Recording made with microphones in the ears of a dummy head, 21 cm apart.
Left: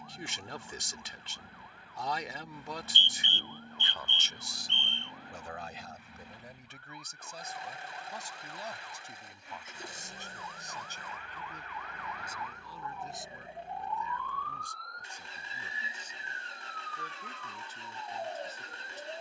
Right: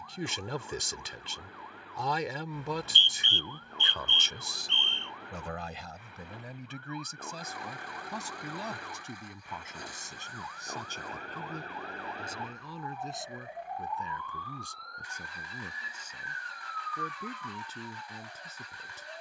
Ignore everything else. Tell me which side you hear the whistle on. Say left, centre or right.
right.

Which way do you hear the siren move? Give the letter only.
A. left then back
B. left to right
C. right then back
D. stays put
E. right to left
E.